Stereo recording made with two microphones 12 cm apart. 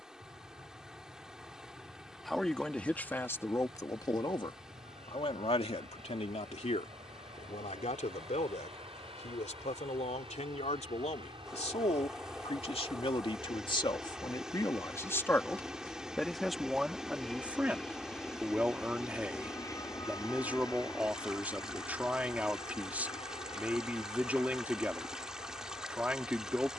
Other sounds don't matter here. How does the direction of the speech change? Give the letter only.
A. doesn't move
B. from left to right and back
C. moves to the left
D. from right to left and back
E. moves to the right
D.